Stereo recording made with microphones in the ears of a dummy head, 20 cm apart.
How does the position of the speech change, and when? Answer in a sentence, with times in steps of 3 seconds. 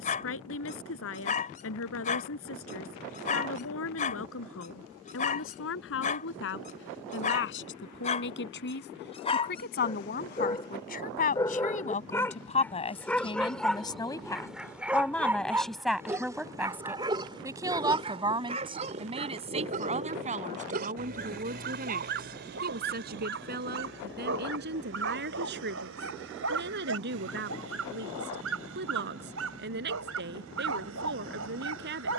You can hear the speech on the left from 0 s, in the centre from 15 s and on the right from 18 s.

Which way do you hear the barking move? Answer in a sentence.
You can hear the barking move from left to right.